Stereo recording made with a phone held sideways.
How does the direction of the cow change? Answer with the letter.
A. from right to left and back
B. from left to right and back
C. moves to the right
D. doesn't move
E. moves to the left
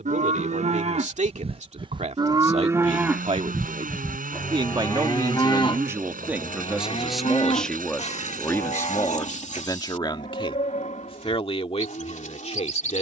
E.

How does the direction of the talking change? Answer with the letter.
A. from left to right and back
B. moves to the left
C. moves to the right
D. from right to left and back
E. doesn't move
B.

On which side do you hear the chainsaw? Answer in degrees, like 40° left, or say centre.
80° right.